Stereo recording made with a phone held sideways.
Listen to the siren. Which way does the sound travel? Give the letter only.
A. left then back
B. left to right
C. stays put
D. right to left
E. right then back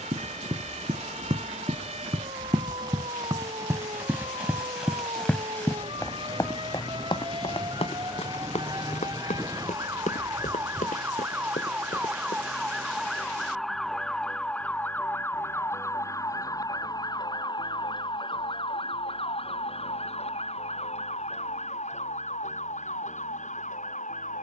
D.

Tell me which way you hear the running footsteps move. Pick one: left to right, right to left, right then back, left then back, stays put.
right to left.